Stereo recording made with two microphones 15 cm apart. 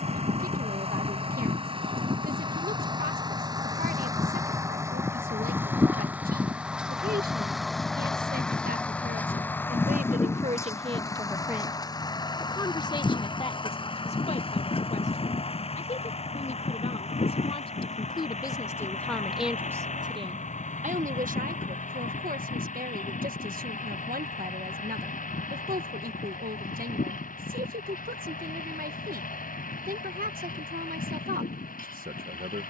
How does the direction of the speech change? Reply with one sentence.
In this clip you hear the speech move from right to left and back again.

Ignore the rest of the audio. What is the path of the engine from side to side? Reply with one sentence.
In this clip you hear the engine move to the left.